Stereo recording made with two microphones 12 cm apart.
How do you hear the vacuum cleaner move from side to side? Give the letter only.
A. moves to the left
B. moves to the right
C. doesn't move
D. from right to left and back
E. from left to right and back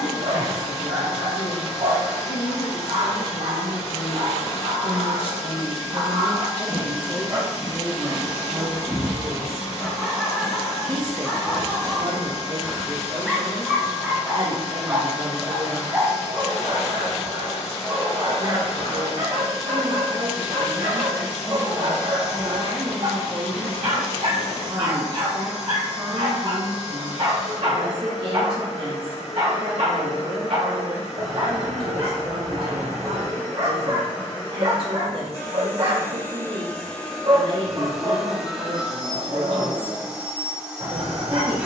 B.